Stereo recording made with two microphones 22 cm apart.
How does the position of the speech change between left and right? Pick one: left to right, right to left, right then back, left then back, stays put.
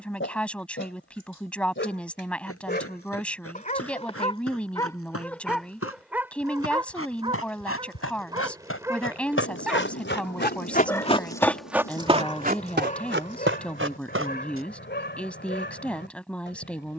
stays put.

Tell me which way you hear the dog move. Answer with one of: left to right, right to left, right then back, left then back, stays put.
right then back.